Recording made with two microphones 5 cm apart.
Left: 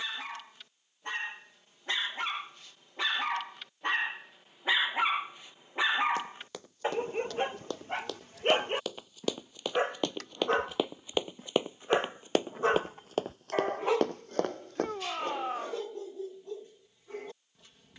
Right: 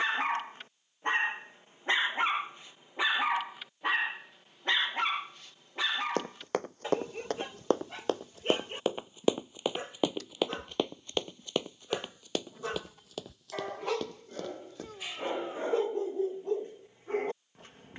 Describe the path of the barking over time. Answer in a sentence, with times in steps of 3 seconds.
In this clip you hear the barking on the right from 0 s, in the centre from 3 s, on the left from 6 s and on the right from 15 s.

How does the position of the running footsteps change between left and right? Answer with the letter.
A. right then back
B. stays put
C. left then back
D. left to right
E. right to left
E.